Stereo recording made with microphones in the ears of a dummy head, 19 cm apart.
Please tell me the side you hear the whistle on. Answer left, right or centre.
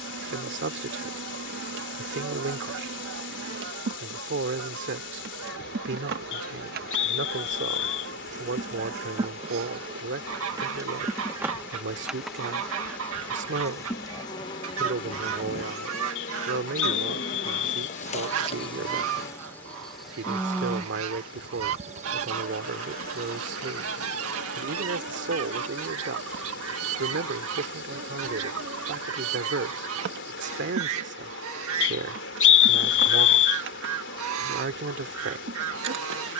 left.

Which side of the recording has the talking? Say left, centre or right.
right.